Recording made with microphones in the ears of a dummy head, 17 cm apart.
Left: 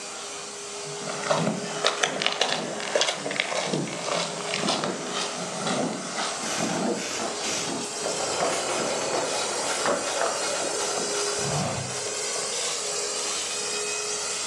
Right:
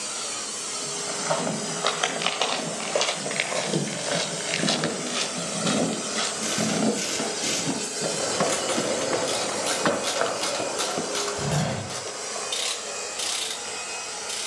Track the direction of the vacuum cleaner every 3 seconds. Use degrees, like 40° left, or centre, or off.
60° right, 50° right, 30° right, 20° left, 50° left.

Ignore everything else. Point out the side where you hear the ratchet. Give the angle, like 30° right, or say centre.
40° right.